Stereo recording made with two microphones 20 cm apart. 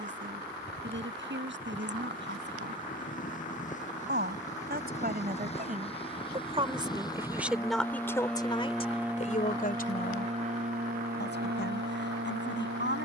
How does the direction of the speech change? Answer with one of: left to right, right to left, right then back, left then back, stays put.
right to left.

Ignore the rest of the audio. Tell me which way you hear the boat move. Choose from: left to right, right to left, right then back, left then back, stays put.
left to right.